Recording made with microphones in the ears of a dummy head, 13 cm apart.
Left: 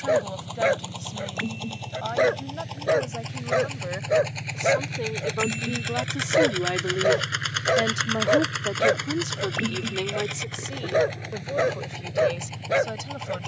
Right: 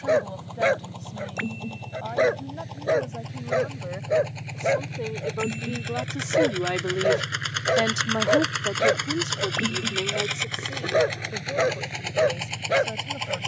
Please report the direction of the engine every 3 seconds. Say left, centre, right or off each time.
left, left, centre, right, right.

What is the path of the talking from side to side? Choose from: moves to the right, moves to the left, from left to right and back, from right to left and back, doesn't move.
from left to right and back.